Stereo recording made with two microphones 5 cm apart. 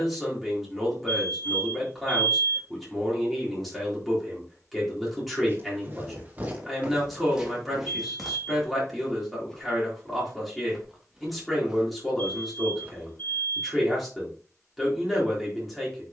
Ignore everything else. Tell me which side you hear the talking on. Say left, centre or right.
centre.